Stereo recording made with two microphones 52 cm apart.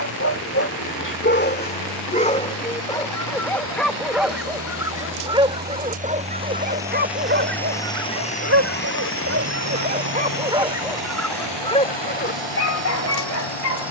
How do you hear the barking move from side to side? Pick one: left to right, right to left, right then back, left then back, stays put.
right then back.